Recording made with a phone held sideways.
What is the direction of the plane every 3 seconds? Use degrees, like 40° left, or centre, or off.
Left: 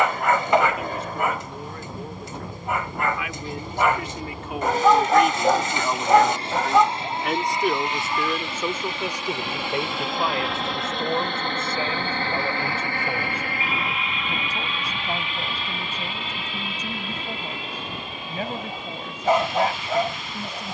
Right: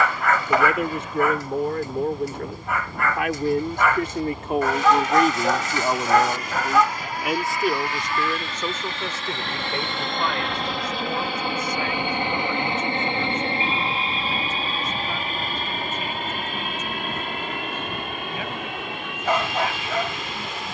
50° left, 40° left, 20° left, centre, 30° right, 50° right, 60° right.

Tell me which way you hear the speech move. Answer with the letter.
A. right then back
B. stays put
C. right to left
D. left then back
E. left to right
C.